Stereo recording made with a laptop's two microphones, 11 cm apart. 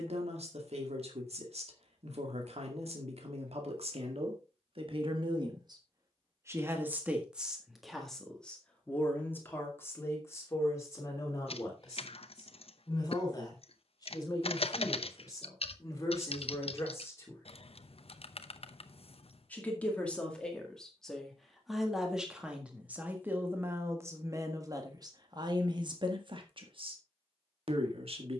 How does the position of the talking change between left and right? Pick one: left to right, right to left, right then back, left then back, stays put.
left then back.